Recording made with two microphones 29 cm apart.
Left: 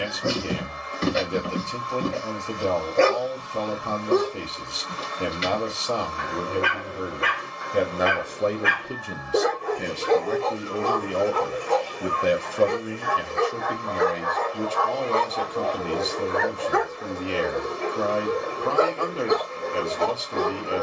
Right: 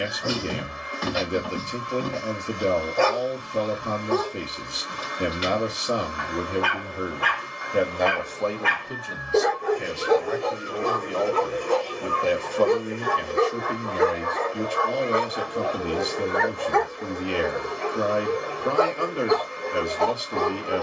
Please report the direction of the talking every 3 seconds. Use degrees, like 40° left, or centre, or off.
20° right, 20° right, centre, 40° left, centre, 10° right, 10° right.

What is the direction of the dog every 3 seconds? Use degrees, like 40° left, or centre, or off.
30° left, 30° left, 20° left, 20° right, 40° right, centre, 20° left.